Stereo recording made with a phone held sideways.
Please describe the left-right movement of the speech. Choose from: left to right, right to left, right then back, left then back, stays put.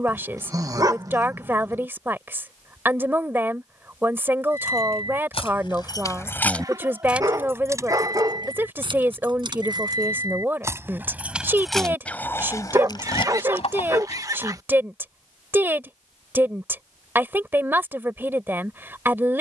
stays put.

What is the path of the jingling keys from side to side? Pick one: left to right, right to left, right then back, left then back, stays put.
right then back.